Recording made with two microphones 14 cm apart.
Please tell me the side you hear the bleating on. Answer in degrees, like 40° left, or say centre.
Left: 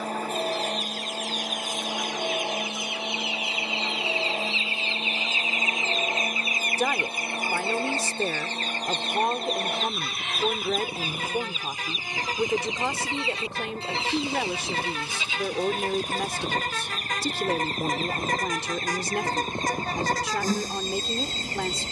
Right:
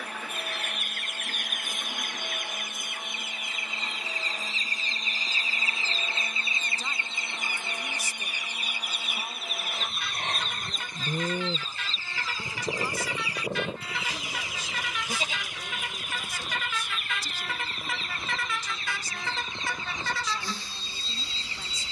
40° right.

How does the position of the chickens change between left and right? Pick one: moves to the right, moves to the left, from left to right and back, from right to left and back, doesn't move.
moves to the left.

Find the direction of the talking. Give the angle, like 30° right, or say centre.
80° left.